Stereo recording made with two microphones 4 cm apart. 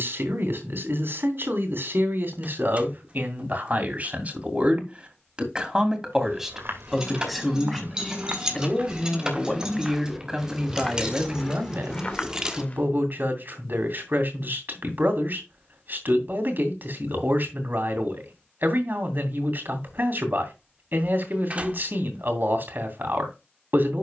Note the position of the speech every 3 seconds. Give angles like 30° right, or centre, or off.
60° right, 40° right, centre, 20° right, 60° right, 60° right, 60° right, 60° right.